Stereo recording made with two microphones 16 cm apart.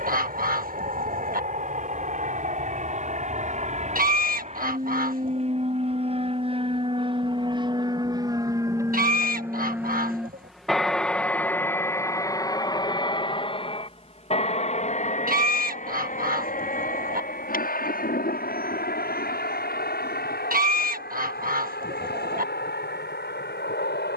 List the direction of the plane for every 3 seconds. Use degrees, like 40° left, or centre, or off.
60° right, 50° right, 30° right, centre, 30° left, 50° left, 60° left, 70° left.